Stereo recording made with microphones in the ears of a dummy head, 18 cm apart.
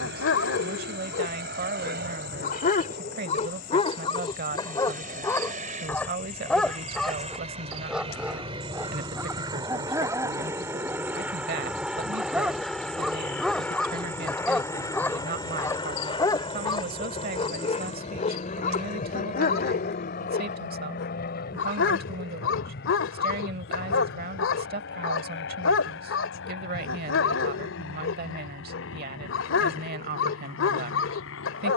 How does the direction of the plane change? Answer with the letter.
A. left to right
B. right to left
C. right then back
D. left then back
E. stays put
B.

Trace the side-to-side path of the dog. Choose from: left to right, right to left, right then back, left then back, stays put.
right then back.